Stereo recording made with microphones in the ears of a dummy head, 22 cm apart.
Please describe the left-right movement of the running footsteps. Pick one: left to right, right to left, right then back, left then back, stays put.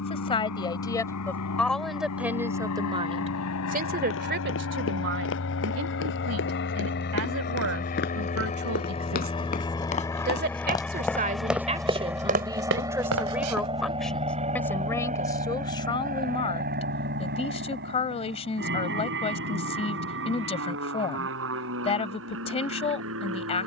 left to right.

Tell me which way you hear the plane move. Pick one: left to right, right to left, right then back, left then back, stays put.
left to right.